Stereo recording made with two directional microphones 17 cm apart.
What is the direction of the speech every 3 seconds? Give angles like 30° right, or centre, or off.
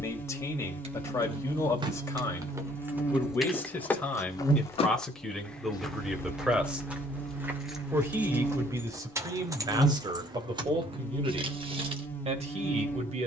20° left, 10° left, 10° right, 30° right, 40° right.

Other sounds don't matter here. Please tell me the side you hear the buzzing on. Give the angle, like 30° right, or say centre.
10° left.